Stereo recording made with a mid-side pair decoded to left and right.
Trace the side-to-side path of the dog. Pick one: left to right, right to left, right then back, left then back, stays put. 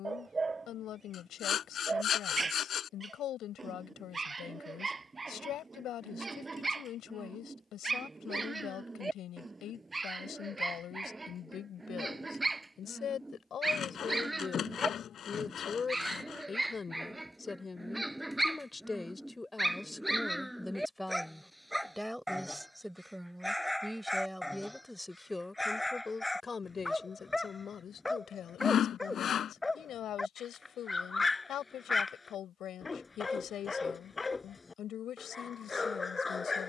right to left.